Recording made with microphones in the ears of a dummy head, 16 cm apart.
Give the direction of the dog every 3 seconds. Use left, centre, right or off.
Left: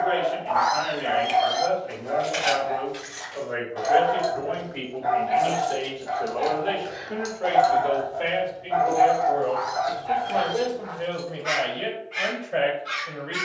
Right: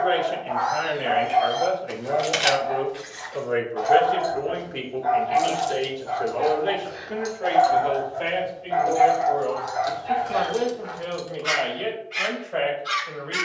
left, left, centre, right, right.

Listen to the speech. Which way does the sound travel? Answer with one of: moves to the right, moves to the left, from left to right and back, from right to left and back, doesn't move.
moves to the left.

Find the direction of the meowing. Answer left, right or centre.
left.